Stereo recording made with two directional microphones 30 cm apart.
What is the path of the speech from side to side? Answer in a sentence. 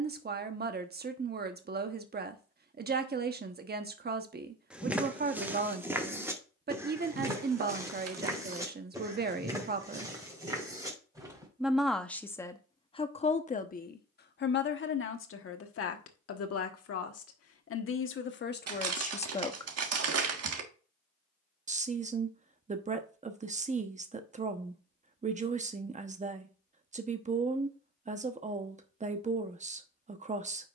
In this clip you hear the speech go left and come back.